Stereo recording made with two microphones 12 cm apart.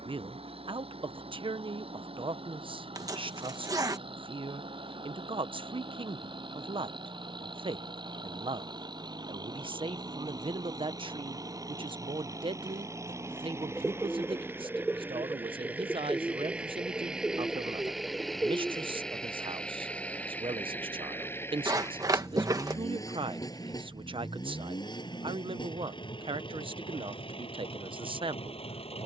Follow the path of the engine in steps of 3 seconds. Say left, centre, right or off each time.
right, right, right, right, right, centre, centre, left, left, left.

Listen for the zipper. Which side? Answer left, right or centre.
right.